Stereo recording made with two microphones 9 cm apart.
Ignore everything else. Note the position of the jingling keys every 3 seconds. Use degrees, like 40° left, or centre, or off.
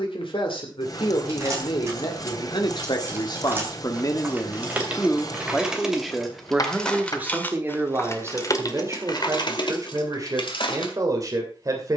30° right, 20° right, 20° left, 60° left.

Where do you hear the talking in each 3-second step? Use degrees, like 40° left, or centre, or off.
70° left, 30° left, 20° right, 40° right.